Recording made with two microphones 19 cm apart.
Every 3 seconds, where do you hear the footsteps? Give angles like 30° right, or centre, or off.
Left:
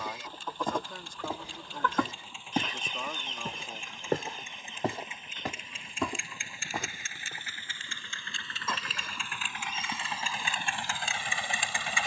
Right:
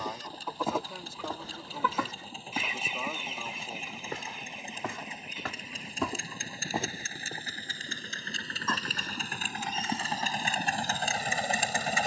10° left, 40° left, 20° right, off.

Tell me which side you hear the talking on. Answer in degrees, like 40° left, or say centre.
10° right.